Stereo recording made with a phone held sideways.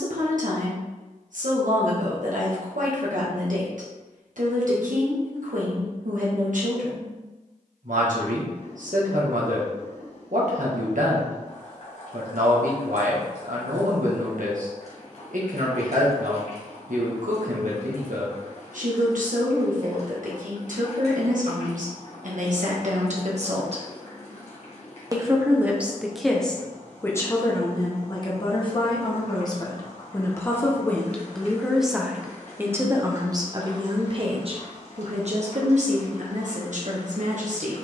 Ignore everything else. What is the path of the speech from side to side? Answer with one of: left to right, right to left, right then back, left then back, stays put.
left then back.